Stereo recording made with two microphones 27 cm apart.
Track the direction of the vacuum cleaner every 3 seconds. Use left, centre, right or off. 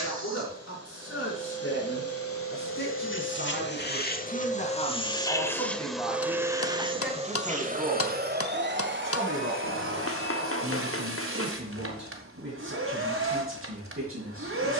left, left, right, right, right.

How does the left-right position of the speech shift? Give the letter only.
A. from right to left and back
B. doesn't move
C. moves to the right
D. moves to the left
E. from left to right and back
C.